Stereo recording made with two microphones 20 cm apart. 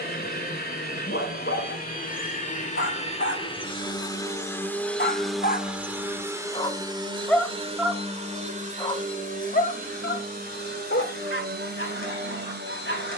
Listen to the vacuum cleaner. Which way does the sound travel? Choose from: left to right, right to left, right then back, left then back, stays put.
left to right.